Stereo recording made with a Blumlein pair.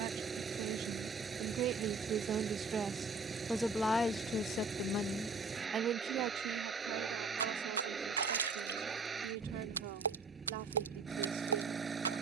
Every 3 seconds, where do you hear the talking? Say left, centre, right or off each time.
right, centre, right, right.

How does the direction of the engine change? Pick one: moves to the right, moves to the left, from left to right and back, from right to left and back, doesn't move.
doesn't move.